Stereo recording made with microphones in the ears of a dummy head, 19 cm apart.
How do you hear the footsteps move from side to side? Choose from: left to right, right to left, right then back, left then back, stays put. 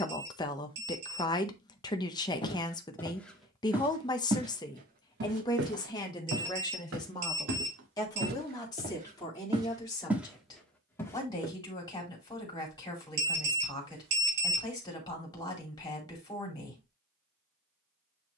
right then back.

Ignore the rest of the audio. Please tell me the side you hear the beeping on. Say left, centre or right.
right.